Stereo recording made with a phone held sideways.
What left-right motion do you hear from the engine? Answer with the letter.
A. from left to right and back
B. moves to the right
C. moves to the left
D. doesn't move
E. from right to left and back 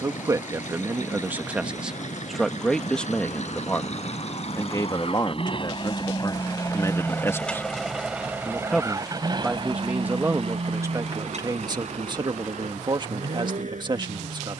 B.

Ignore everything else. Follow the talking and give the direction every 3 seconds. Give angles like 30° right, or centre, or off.
10° right, 20° left, 20° left, 20° right, 30° right.